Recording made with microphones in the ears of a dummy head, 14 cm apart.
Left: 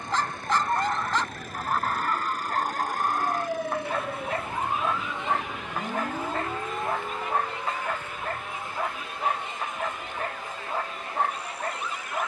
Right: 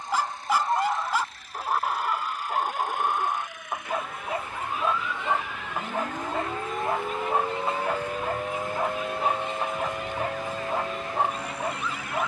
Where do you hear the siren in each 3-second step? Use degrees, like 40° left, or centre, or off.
50° left, 30° left, 20° right, 60° right.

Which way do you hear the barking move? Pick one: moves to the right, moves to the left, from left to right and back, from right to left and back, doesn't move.
doesn't move.